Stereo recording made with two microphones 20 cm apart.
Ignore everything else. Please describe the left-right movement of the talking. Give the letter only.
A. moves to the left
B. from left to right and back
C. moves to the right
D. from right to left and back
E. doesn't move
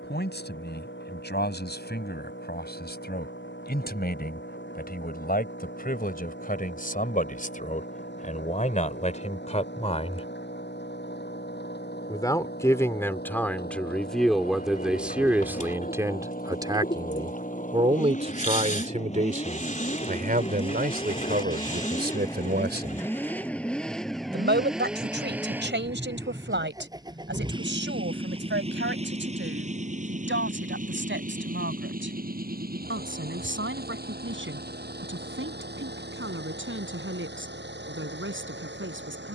C.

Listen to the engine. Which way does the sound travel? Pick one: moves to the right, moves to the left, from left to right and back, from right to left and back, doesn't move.
moves to the right.